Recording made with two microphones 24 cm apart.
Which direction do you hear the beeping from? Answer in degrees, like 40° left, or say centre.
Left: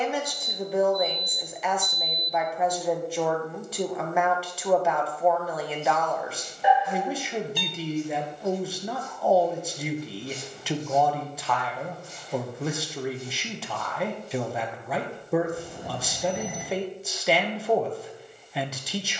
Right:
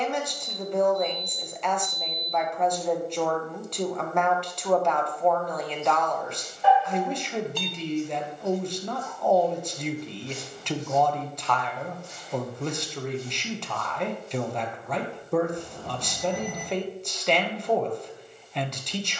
20° left.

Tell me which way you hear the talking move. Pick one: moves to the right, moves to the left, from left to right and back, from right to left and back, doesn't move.
doesn't move.